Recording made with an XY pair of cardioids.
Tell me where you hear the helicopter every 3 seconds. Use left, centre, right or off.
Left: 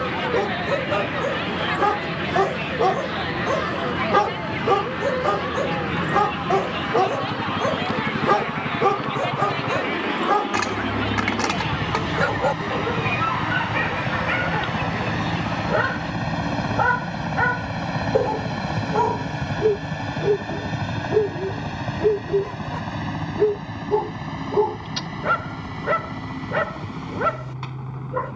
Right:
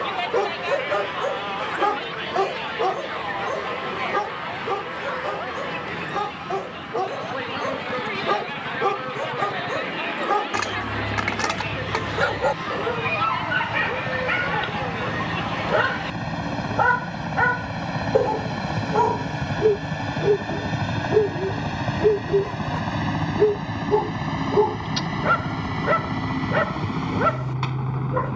left, left, left, left, left, centre, centre, right, right, right.